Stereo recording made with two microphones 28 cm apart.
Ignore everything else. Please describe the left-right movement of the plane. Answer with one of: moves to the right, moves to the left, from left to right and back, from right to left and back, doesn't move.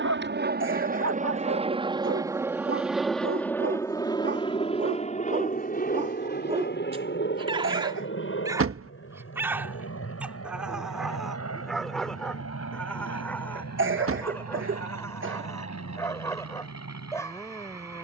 moves to the left.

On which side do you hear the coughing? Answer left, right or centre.
right.